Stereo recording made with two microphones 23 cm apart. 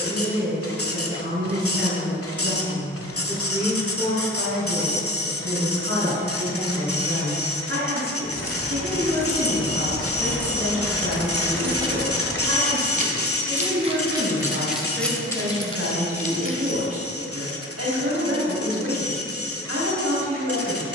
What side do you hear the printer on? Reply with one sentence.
You can hear the printer on the left.